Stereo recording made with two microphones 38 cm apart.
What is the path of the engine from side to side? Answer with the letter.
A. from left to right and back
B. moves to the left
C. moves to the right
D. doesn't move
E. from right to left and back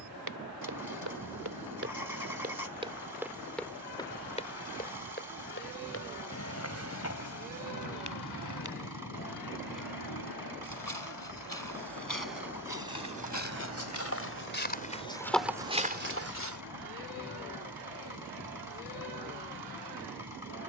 D.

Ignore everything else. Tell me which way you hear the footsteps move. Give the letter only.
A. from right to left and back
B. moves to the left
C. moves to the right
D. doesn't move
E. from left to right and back
A.